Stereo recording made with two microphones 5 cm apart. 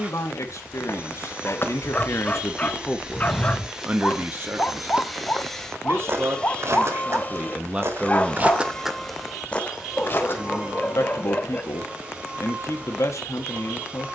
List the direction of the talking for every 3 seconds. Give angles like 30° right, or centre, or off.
60° left, 30° right, 30° right, 60° left, 60° left.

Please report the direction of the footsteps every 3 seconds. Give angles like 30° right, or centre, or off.
40° left, 10° right, 40° right, 30° left, off.